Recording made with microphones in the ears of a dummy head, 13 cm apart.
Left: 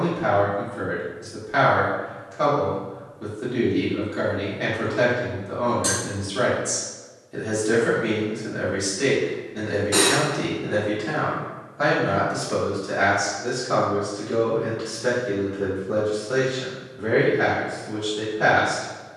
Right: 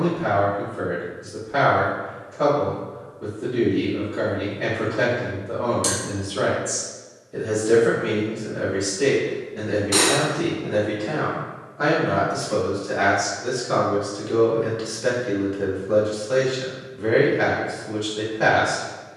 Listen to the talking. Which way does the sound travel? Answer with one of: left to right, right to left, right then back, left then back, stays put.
left to right.